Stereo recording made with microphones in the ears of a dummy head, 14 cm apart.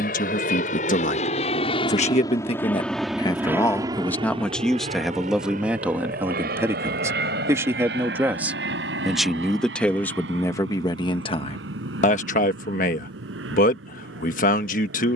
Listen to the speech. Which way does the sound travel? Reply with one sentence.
You can hear the speech go right and come back.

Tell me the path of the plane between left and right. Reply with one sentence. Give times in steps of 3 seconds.
In this clip you hear the plane on the left from 0 s and on the right from 3 s.